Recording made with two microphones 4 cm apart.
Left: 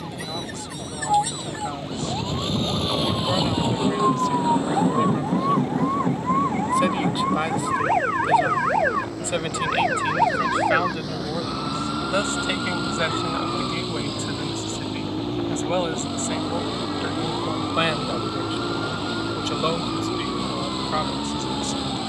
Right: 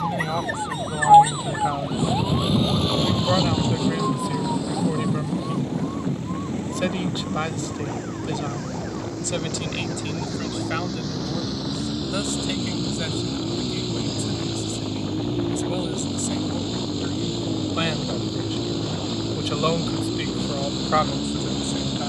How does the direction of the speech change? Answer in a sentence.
In this clip you hear the speech go left and come back.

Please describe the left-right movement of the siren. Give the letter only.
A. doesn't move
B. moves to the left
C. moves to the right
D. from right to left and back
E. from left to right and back
B.